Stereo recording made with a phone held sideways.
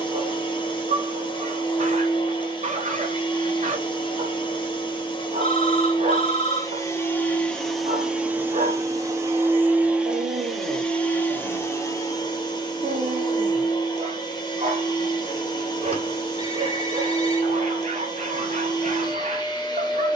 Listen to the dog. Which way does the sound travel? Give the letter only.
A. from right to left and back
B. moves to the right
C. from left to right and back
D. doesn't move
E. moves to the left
D.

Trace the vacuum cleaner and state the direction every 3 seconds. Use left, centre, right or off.
left, left, centre, centre, left, left, left.